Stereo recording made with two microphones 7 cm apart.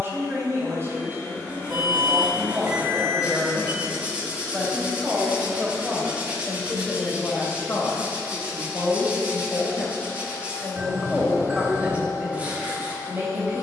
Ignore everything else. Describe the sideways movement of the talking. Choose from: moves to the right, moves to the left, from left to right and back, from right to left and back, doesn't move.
from right to left and back.